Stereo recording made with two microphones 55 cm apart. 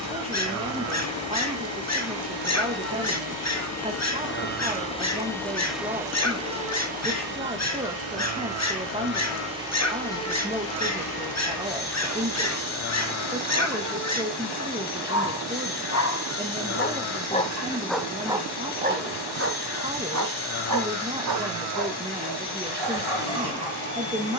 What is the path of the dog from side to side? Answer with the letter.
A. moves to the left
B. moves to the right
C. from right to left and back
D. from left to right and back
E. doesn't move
B.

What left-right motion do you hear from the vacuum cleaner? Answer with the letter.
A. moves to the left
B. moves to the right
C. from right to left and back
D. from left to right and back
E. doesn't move
D.